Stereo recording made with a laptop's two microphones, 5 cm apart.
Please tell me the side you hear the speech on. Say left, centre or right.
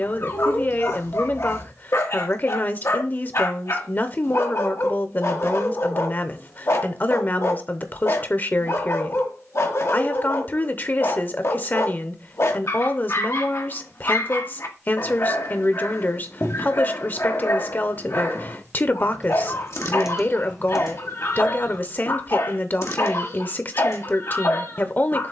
left.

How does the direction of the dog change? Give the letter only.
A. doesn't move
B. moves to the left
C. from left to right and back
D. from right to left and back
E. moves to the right
A.